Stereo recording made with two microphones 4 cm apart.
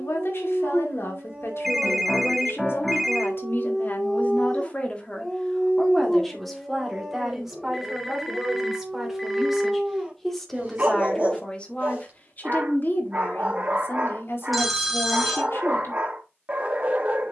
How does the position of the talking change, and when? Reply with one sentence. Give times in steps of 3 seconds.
You can hear the talking on the left from 0 s, in the centre from 6 s and on the left from 12 s.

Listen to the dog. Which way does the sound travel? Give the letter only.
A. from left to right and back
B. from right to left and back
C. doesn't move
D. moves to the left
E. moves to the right
B.